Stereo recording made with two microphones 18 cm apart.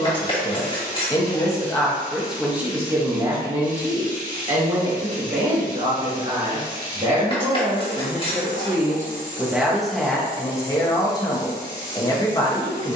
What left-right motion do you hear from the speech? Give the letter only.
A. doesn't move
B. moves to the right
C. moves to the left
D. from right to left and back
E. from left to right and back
E.